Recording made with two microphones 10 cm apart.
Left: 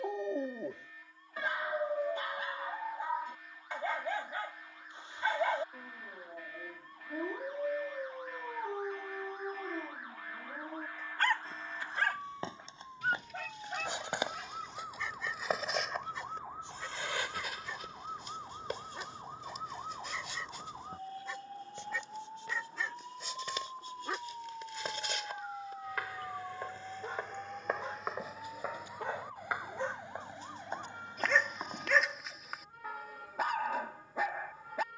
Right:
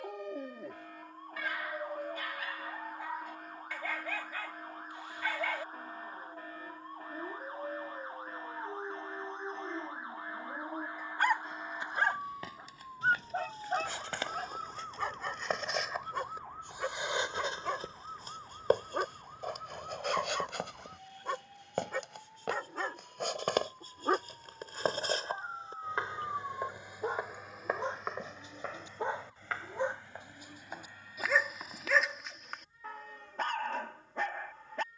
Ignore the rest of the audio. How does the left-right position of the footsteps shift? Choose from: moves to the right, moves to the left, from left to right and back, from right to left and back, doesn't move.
from left to right and back.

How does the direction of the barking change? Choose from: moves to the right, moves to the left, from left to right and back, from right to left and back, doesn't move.
from left to right and back.